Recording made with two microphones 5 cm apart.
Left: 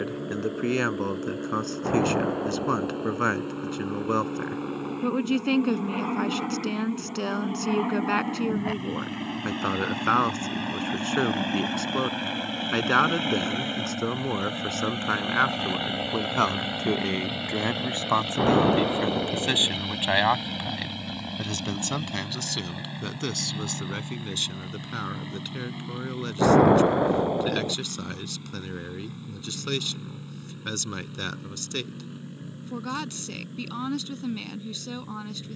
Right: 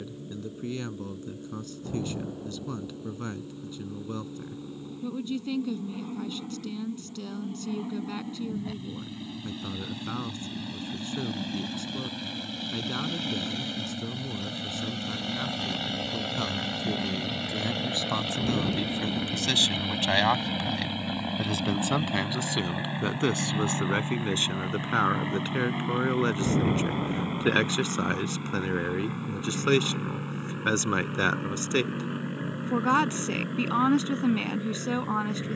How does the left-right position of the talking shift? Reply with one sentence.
You can hear the talking go from the left side to the right.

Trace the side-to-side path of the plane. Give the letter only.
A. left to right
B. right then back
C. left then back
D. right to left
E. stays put
A.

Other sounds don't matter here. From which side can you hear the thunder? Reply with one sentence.
You can hear the thunder on the left.